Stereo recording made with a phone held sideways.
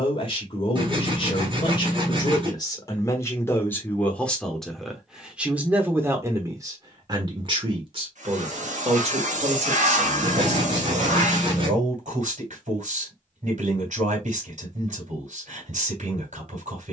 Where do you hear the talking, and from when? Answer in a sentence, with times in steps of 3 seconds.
You can hear the talking on the left from 0 s, in the centre from 3 s and on the right from 6 s.